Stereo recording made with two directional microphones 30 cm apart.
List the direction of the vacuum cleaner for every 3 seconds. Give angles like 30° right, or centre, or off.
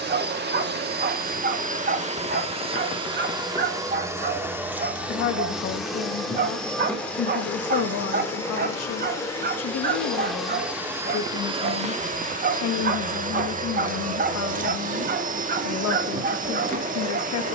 30° right, 10° right, 10° left, centre, 30° right, 30° right.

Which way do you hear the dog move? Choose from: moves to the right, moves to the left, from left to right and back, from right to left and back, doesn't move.
doesn't move.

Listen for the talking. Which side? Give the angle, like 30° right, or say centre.
60° left.